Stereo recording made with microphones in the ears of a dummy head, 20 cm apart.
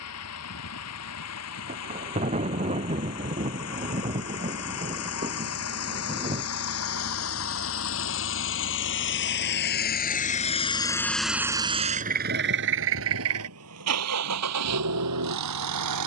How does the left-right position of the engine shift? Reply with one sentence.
You can hear the engine move to the right.